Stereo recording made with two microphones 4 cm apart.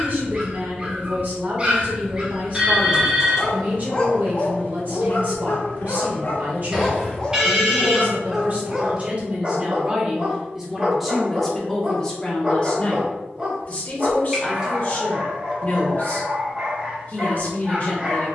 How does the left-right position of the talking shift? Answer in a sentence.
You can hear the talking move from right to left.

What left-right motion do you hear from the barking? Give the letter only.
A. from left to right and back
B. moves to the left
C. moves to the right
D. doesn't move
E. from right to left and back
E.